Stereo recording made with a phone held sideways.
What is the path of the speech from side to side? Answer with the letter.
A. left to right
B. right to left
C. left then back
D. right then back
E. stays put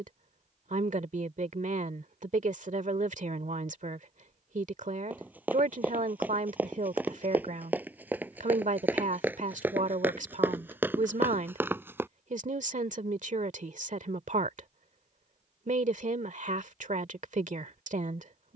E.